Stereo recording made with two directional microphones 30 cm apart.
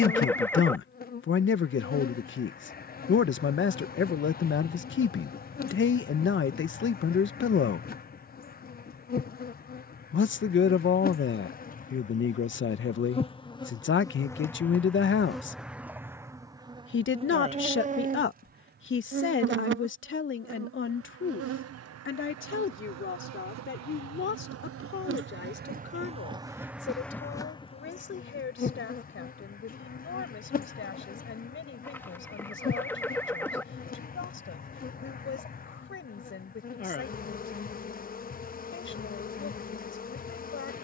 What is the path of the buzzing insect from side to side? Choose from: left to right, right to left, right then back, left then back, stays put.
right then back.